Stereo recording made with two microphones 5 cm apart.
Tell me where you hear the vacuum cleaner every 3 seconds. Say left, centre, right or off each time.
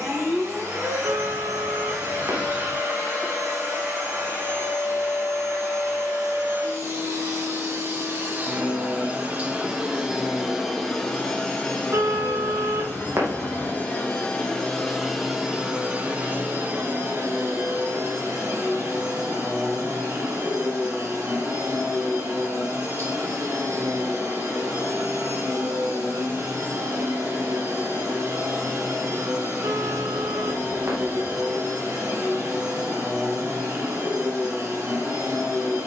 right, right, right, centre, left, right, right, right, right, right, right, right.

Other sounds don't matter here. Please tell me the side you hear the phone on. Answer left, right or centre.
right.